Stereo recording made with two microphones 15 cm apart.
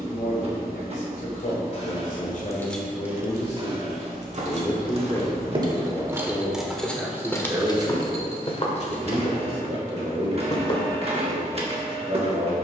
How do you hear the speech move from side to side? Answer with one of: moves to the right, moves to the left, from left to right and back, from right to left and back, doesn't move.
moves to the right.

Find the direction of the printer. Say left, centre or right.
right.